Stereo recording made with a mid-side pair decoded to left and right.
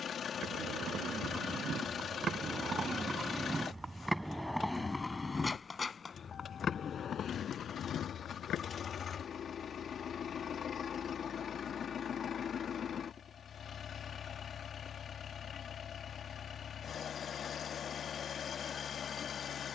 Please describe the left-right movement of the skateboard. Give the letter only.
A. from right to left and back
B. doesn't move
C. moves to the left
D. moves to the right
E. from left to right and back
C.